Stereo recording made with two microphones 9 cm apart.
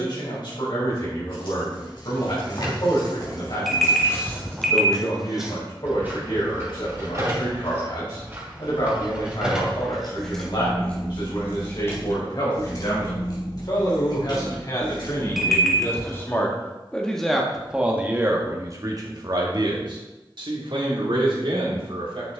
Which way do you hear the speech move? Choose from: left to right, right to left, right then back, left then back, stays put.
left to right.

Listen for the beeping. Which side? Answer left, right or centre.
centre.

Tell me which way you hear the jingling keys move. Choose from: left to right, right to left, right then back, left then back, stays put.
right then back.